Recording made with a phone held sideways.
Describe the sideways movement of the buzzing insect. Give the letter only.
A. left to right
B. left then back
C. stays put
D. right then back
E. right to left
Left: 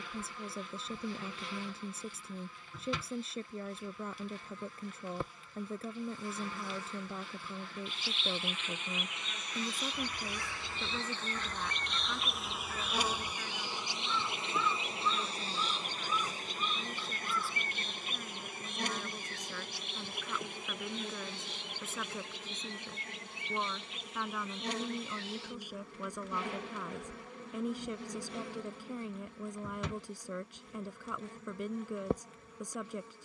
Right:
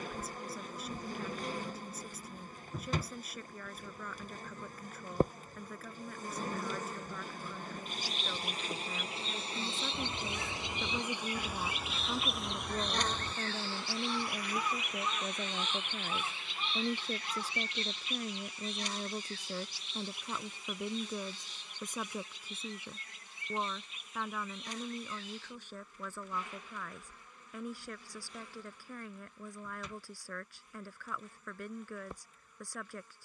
E.